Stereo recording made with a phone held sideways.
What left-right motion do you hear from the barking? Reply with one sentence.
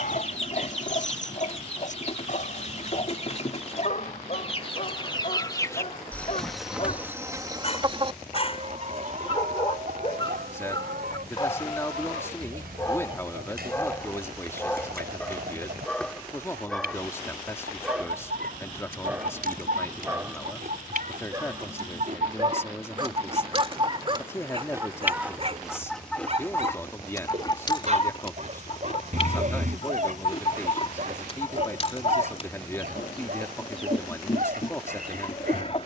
You can hear the barking move from left to right.